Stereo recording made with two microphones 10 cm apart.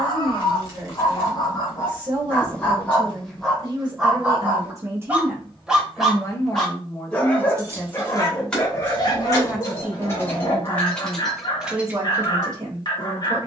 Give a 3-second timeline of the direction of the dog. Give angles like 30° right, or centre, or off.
30° left, 10° right, 20° left, 40° left, 40° left.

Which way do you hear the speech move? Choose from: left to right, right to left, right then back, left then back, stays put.
left then back.